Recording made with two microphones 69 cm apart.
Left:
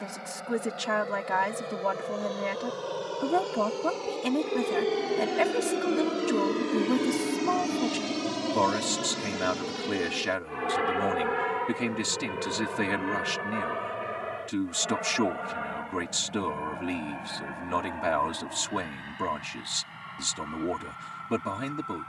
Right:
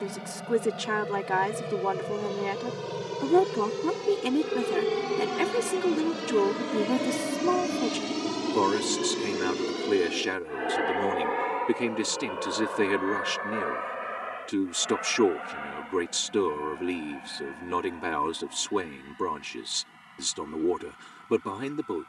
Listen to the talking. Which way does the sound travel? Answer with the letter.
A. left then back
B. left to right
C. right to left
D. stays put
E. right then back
D.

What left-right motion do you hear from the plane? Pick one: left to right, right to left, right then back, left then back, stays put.
right to left.